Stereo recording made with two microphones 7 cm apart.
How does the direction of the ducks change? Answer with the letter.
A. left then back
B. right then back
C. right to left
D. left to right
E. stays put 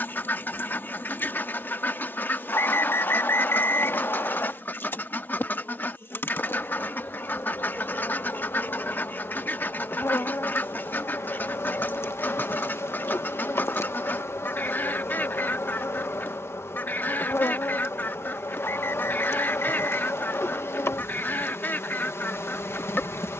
E.